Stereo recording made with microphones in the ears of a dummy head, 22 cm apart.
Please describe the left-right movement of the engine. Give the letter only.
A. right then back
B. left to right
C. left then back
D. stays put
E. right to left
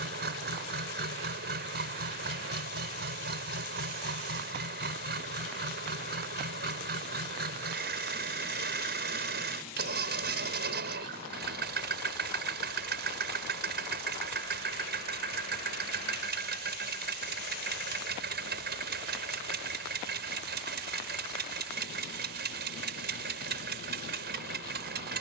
D.